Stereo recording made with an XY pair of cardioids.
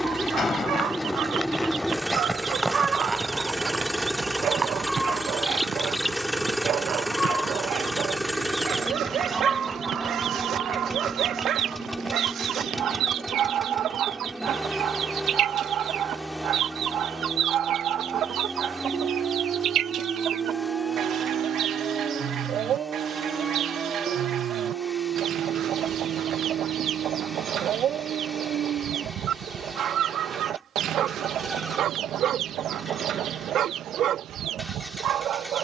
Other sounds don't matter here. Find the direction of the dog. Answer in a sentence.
You can hear the dog on the right.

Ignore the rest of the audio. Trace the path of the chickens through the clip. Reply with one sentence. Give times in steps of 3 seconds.
In this clip you hear the chickens on the right from 0 s, in the centre from 3 s and on the right from 9 s.